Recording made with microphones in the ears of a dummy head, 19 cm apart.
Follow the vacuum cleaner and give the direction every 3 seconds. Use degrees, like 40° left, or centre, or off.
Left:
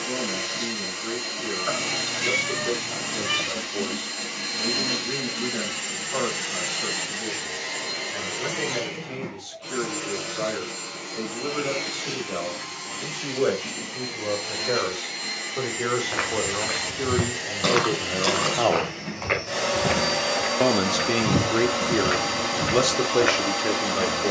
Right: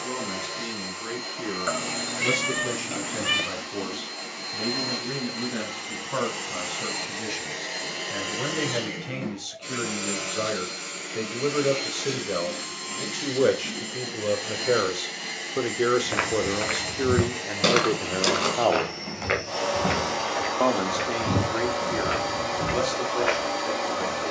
30° left, 30° left, centre, 20° right, 10° right, centre, 20° left, 30° left.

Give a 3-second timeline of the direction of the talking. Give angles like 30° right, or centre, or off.
60° right, 60° right, 60° right, 50° right, 40° right, 20° right, centre, 50° left.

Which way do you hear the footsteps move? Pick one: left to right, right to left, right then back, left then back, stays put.
right to left.